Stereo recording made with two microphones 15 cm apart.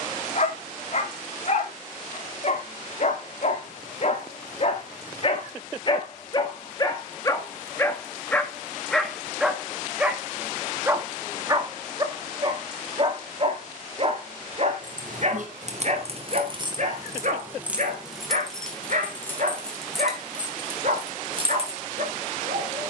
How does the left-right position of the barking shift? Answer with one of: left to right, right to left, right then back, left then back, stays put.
left to right.